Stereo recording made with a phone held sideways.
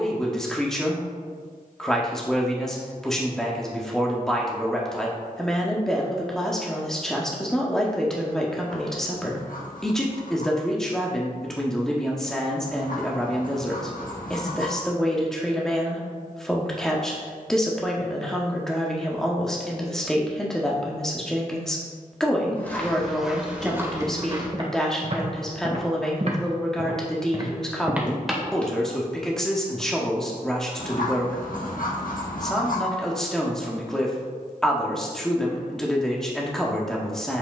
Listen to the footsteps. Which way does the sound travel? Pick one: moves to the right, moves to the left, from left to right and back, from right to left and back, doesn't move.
from left to right and back.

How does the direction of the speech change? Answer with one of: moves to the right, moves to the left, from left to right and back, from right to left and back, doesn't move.
doesn't move.